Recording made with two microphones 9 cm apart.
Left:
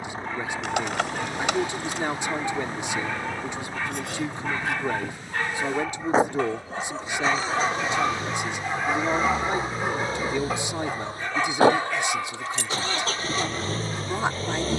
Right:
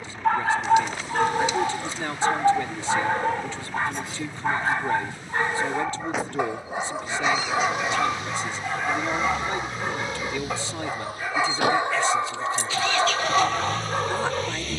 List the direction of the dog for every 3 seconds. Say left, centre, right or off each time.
right, right, centre, centre, right.